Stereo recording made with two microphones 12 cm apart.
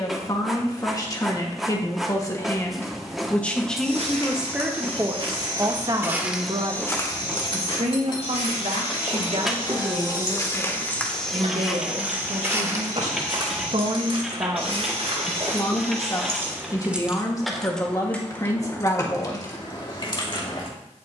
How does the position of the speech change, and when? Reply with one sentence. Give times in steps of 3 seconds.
You can hear the speech on the left from 0 s, in the centre from 3 s, on the right from 6 s and on the left from 15 s.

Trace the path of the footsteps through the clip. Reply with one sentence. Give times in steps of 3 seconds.
In this clip you hear the footsteps not at all from 0 s, on the right from 3 s, on the left from 6 s, on the right from 12 s and not at all from 18 s.